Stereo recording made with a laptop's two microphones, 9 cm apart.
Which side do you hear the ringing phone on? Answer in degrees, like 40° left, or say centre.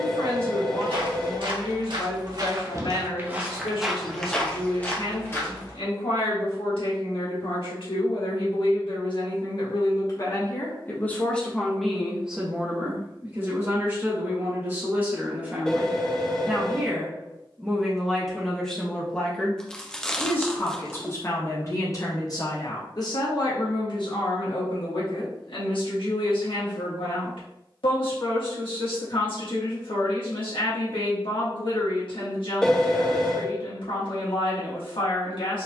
10° left.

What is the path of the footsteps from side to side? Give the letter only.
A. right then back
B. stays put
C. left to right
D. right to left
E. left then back
D.